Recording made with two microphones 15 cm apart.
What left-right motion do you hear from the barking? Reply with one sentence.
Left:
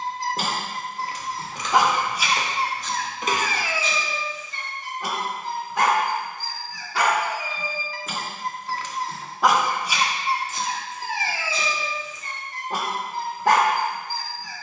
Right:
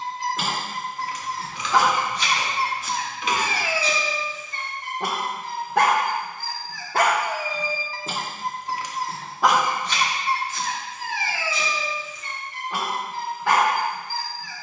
You can hear the barking go right and come back.